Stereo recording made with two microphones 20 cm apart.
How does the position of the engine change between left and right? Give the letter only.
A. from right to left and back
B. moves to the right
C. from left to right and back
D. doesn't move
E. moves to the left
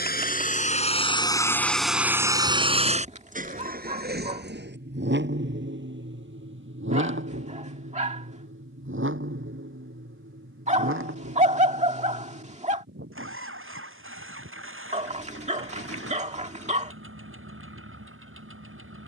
B.